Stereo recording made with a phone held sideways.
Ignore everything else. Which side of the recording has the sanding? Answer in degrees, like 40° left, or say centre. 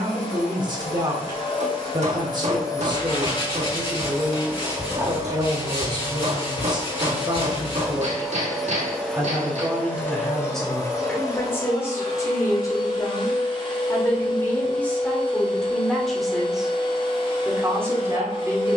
40° left.